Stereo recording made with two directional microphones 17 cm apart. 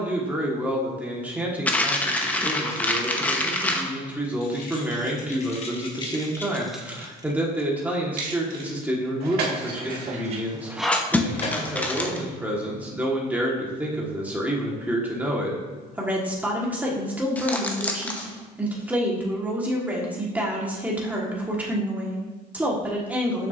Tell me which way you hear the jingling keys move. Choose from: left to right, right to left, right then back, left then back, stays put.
right then back.